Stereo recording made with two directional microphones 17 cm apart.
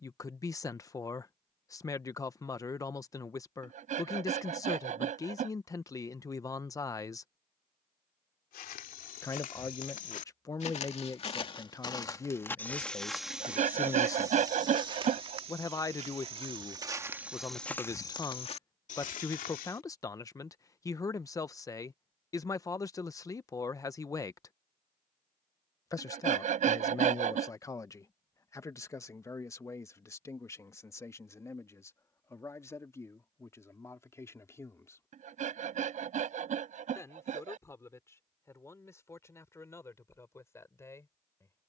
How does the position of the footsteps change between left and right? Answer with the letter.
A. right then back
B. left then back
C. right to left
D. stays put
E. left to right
A.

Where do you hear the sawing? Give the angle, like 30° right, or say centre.
50° right.